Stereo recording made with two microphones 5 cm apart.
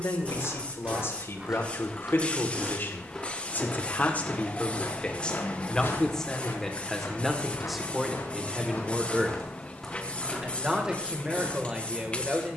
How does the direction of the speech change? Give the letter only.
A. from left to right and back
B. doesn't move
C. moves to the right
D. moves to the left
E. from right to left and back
C.